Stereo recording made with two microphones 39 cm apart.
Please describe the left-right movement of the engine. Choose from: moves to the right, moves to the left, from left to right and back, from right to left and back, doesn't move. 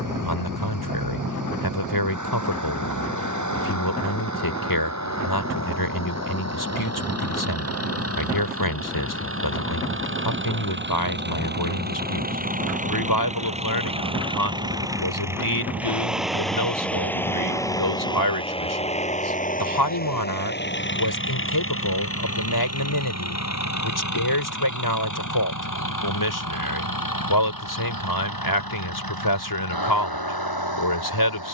moves to the left.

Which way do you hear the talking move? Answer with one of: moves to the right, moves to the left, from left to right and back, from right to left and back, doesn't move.
doesn't move.